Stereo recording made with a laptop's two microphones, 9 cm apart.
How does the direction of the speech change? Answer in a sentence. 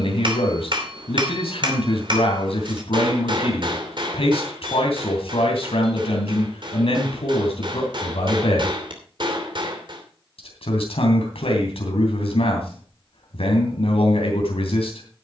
In this clip you hear the speech stay in one place.